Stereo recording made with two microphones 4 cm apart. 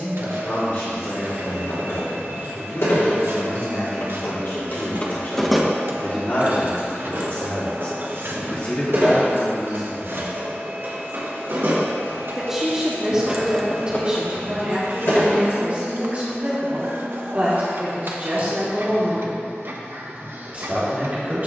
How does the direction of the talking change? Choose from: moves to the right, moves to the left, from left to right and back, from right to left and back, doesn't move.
moves to the right.